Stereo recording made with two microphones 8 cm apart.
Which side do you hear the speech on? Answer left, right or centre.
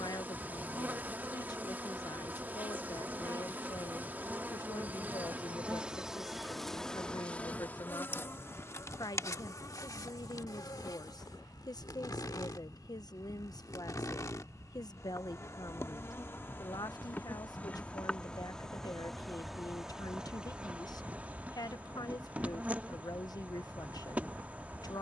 left.